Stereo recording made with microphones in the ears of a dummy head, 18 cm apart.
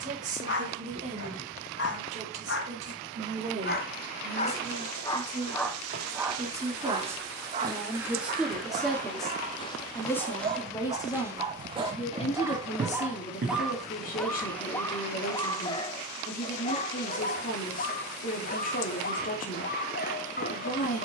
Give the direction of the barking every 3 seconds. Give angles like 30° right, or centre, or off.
60° left, 30° left, 30° right, 30° right, centre, 30° left, 40° left.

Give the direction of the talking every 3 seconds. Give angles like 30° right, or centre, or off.
40° right, 30° right, 10° right, 10° left, 40° left, 40° left, 40° left.